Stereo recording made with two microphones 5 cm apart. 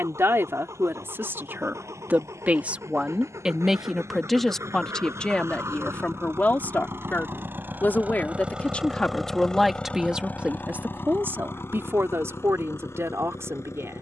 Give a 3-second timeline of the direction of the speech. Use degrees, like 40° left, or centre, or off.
50° right, 10° left, 30° left, 20° right, 70° right.